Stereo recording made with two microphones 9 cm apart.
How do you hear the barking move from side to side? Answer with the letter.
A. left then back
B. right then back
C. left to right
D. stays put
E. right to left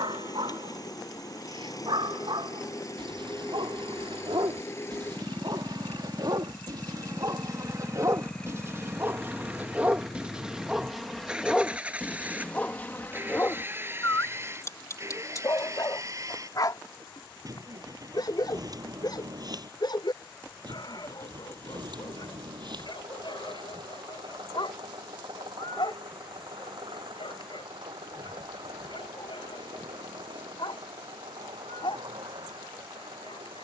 E.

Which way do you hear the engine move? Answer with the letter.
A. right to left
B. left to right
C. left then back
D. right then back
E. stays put
B.